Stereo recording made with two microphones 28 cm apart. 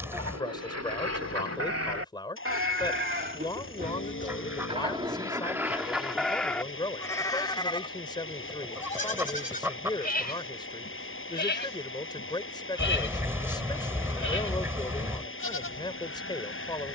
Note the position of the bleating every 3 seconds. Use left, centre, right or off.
right, right, centre, left, left, left.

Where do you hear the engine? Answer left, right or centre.
left.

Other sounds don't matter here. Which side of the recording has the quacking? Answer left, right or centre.
centre.